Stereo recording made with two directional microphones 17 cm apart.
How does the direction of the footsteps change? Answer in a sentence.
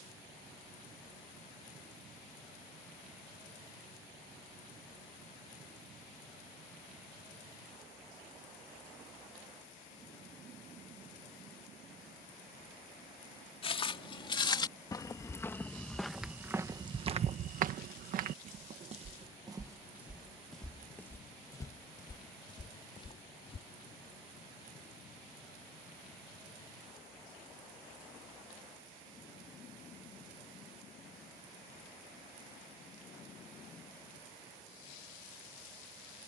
You can hear the footsteps move from left to right and back again.